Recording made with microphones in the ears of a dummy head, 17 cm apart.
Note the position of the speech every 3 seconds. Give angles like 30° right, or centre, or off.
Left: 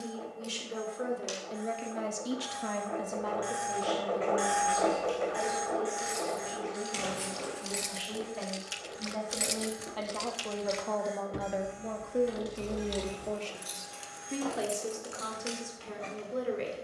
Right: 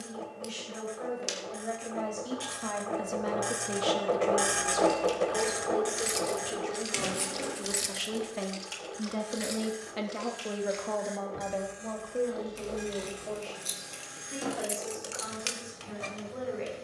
40° left, 50° right, 60° right, 10° right, 40° left, 50° left.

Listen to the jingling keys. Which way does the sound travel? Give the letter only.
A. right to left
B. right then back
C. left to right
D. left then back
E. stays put
D.